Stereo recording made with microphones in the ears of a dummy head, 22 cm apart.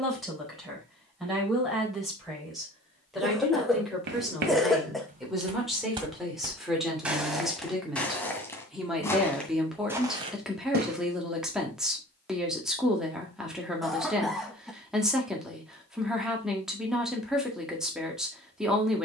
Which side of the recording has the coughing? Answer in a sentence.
You can hear the coughing in the centre.